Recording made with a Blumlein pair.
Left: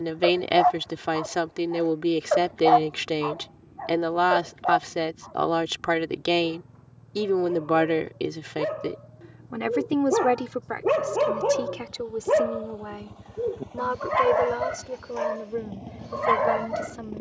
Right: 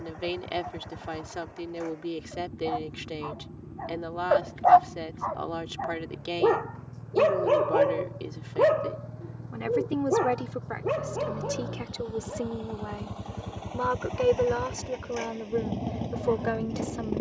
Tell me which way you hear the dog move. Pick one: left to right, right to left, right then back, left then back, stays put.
right then back.